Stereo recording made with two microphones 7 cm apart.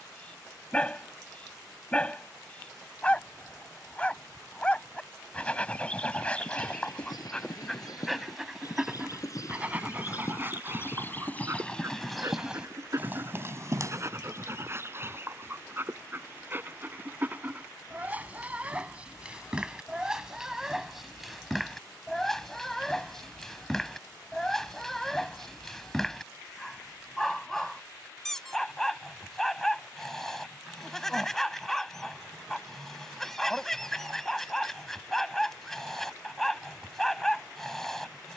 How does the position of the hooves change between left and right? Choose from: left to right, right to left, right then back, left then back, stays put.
left to right.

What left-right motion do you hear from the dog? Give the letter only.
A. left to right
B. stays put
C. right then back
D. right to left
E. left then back
C.